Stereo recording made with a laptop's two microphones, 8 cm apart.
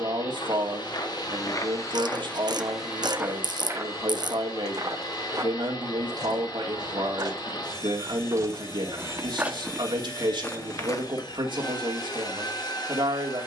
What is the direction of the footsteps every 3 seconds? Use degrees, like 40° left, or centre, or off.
40° left, 40° right, 50° right, 10° left, off.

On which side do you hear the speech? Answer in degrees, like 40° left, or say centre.
80° right.